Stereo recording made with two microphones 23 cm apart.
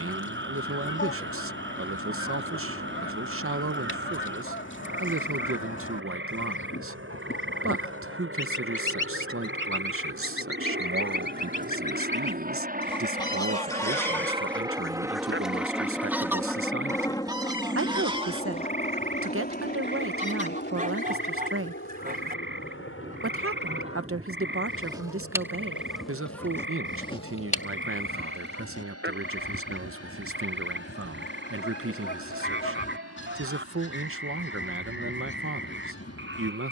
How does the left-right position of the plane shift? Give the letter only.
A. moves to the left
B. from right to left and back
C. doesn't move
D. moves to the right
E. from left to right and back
A.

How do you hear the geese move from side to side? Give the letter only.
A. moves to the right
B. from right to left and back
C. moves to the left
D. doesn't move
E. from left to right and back
E.